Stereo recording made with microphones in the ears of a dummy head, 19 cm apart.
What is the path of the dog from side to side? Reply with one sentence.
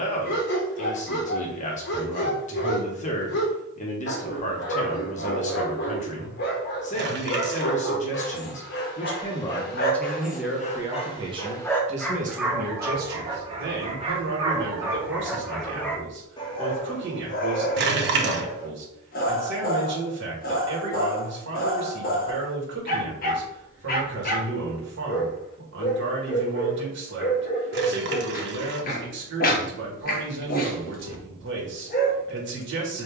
In this clip you hear the dog go right and come back.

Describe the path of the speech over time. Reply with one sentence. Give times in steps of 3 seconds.
In this clip you hear the speech on the left from 0 s, in the centre from 9 s and on the right from 12 s.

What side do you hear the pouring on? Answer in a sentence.
In this clip you hear the pouring on the right.